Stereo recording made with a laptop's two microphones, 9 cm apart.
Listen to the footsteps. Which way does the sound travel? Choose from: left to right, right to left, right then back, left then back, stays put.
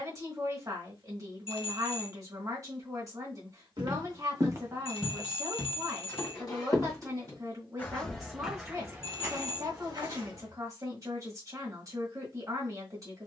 left then back.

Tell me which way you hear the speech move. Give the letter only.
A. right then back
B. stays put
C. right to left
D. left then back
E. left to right
B.